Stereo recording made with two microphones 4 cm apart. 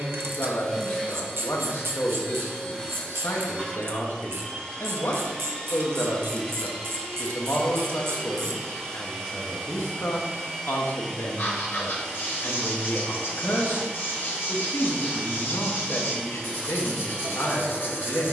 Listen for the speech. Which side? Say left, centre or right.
left.